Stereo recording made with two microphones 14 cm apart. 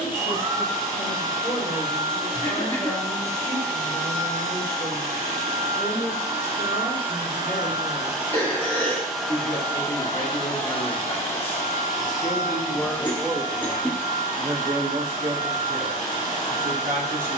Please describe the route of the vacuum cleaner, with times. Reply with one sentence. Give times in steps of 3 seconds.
You can hear the vacuum cleaner on the right from 0 s and on the left from 9 s.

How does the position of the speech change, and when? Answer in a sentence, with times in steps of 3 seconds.
In this clip you hear the speech on the left from 0 s, in the centre from 12 s and on the right from 15 s.